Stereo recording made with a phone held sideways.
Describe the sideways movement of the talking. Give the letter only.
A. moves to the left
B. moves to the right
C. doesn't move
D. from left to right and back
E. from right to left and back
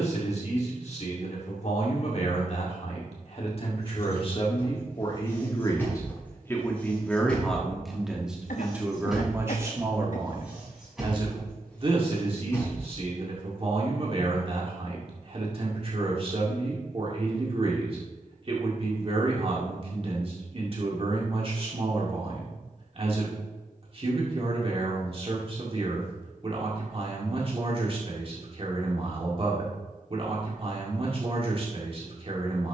B.